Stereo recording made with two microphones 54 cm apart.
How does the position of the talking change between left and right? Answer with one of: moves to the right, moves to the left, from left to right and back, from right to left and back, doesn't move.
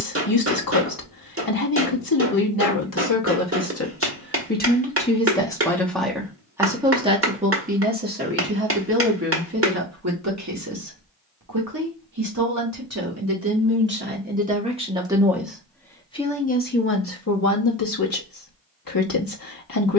from left to right and back.